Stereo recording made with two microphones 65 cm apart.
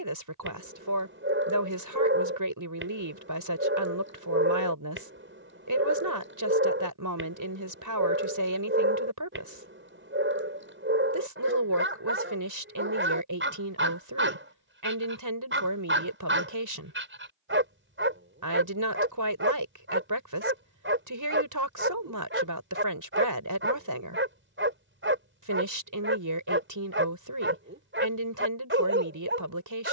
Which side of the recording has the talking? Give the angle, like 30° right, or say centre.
30° right.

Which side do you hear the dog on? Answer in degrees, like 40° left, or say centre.
20° right.